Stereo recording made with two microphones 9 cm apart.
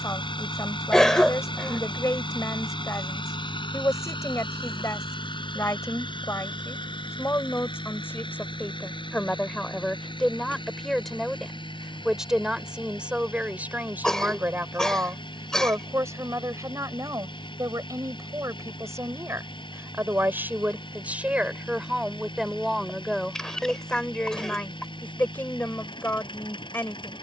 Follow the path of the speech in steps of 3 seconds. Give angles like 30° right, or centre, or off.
30° left, 30° left, 30° left, 10° left, 10° right, 30° right, 30° right, centre, 20° left.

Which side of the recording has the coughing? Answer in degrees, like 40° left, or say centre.
10° left.